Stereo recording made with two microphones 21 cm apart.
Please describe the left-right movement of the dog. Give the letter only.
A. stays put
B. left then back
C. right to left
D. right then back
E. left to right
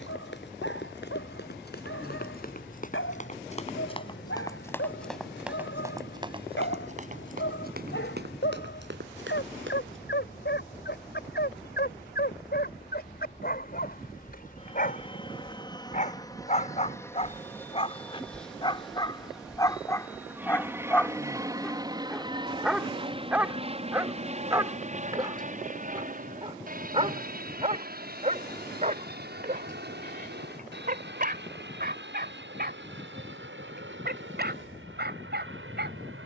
E.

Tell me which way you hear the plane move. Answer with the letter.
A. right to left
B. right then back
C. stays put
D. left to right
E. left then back
D.